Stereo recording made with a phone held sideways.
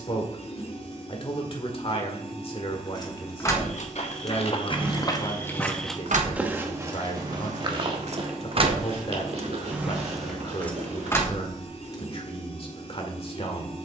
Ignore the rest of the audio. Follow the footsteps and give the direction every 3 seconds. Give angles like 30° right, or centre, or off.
off, 30° left, 30° right, 50° right, off.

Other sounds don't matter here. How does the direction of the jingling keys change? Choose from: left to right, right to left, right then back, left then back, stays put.
right then back.